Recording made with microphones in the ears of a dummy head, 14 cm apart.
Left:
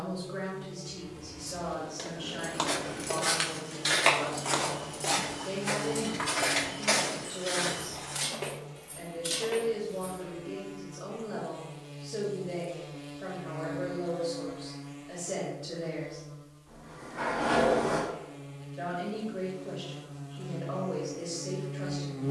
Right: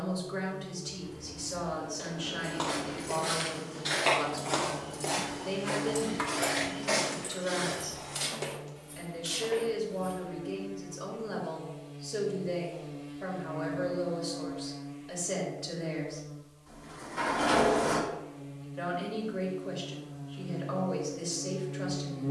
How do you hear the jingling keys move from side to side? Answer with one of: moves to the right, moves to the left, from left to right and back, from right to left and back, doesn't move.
from left to right and back.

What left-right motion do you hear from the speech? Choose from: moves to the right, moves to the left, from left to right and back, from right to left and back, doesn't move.
doesn't move.